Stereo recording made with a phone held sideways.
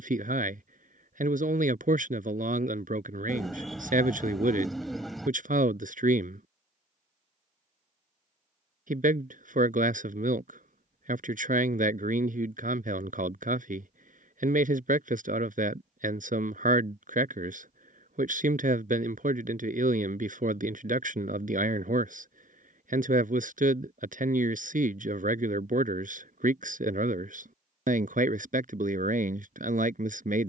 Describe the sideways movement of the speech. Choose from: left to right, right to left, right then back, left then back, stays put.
stays put.